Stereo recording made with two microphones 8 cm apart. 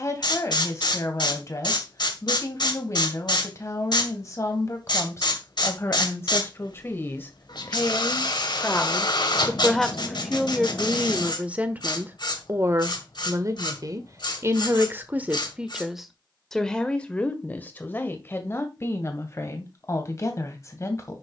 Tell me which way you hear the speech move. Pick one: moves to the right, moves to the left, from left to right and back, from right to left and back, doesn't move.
from left to right and back.